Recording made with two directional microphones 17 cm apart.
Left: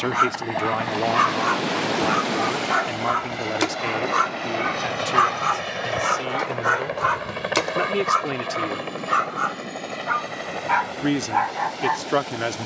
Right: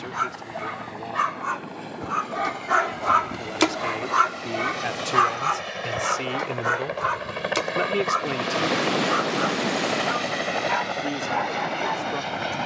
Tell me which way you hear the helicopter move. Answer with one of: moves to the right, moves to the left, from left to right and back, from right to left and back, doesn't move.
moves to the right.